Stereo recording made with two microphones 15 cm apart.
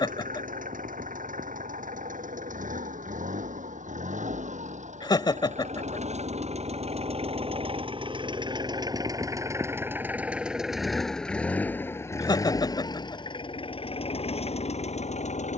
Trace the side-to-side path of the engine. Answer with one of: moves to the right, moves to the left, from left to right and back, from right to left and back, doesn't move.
moves to the left.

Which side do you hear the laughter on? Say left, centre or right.
left.